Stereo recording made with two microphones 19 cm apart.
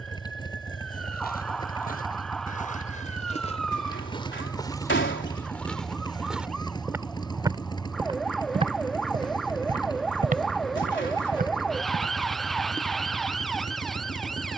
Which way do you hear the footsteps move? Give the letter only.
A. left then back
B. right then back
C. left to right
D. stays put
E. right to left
C.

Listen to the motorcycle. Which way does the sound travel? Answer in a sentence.
In this clip you hear the motorcycle stay put.